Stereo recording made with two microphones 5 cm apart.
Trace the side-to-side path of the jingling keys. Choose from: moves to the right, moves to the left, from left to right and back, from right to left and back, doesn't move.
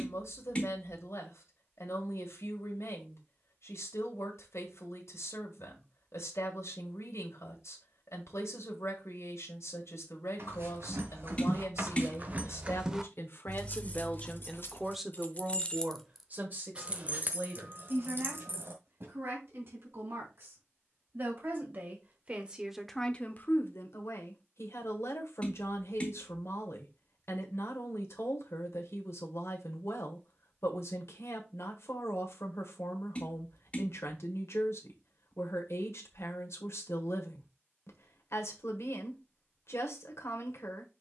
from right to left and back.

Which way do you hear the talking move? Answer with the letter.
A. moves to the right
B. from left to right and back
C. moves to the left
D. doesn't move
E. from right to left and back
B.